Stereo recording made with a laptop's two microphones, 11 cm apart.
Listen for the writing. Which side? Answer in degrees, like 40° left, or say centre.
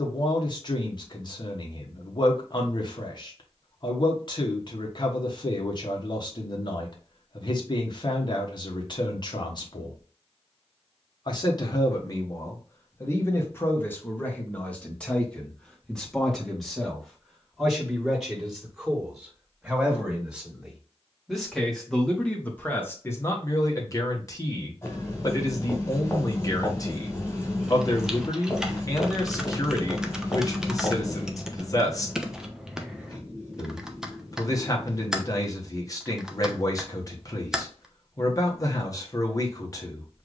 20° left.